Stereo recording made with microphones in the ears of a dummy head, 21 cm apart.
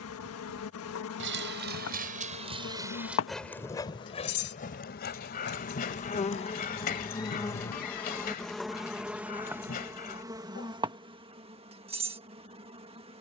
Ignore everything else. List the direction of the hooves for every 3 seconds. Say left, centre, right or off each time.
right, left, left, off, off.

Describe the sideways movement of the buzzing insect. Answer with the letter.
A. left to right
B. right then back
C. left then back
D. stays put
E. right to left
A.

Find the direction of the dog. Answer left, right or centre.
left.